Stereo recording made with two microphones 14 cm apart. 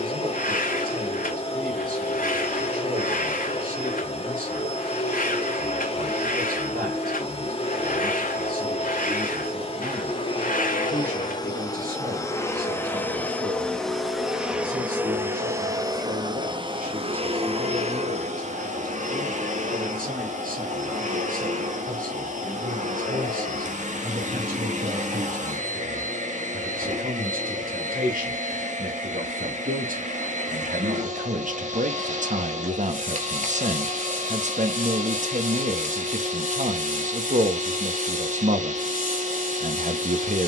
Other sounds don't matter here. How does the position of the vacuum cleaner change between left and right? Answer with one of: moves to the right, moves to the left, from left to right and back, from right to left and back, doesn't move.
moves to the right.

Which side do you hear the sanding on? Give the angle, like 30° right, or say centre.
70° left.